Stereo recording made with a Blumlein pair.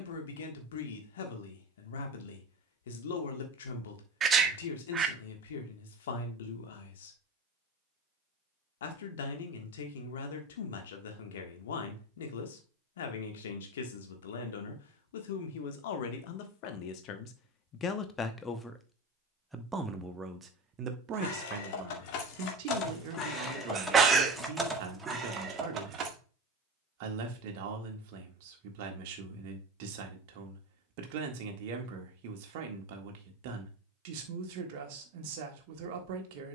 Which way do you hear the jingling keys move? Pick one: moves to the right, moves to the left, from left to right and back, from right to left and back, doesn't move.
moves to the right.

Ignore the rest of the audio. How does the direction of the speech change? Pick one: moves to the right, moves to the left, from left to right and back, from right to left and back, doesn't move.
moves to the right.